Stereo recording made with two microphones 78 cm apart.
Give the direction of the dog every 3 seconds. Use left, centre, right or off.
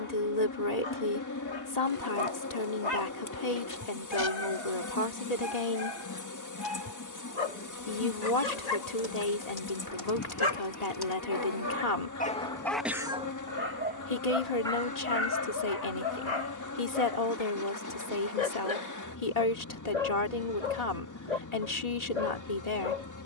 left, left, left, left, centre, left, left, left.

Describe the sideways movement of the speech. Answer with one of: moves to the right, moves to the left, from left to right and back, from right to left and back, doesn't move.
doesn't move.